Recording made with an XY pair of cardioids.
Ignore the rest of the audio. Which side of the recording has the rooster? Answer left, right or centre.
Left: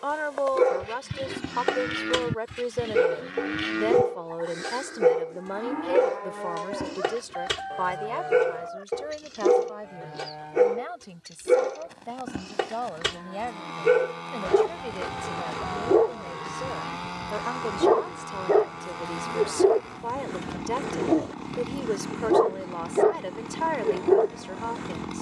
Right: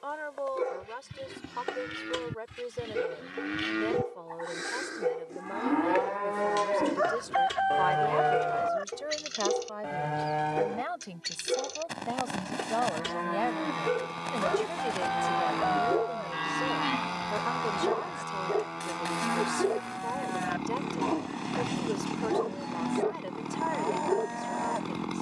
right.